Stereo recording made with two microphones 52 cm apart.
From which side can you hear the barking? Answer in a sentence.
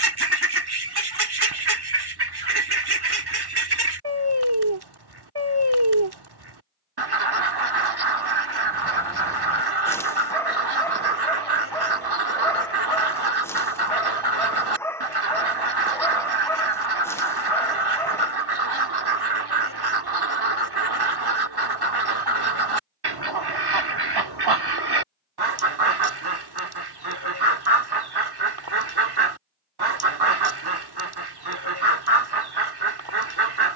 You can hear the barking in the centre.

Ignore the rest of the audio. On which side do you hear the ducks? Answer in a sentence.
In this clip you hear the ducks on the right.